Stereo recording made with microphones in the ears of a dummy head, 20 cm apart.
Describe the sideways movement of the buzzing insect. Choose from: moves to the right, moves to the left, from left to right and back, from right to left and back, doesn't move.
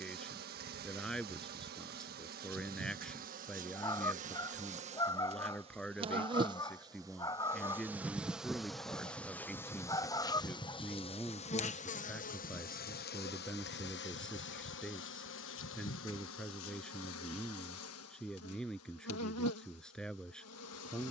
moves to the left.